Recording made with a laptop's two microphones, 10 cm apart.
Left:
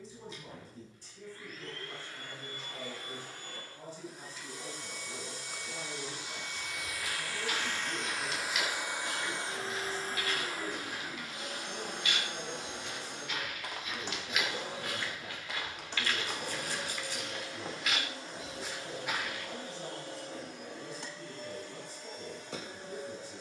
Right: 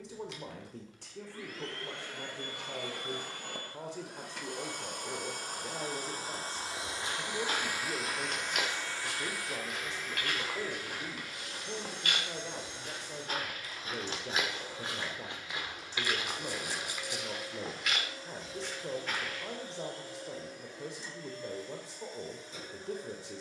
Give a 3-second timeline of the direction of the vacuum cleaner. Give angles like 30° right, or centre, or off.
70° right, 60° right, 10° right, 40° left, 60° left, 70° left, 70° left, 70° left.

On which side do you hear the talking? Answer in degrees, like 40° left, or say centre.
70° right.